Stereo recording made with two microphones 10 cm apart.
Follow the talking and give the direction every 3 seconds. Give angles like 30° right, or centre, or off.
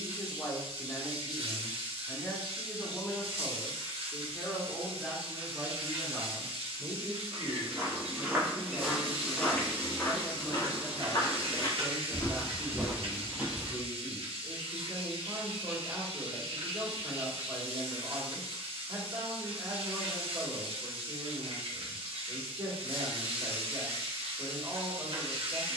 30° left, centre, 30° right, 40° right, 40° right, 40° right, 40° right, 40° right, 40° right.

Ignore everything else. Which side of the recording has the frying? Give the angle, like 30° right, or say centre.
70° right.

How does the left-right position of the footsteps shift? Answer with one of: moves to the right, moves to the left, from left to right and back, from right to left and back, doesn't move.
from right to left and back.